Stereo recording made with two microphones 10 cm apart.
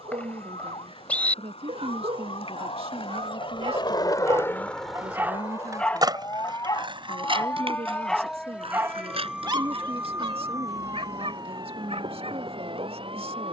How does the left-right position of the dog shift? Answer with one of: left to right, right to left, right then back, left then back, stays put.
left then back.